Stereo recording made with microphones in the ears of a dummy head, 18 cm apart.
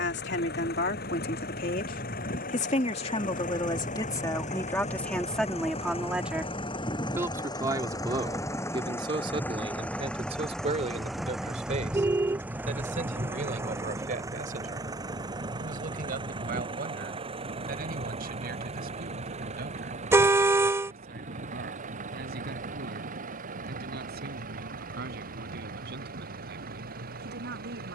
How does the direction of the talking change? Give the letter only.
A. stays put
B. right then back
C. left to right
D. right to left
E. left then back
C.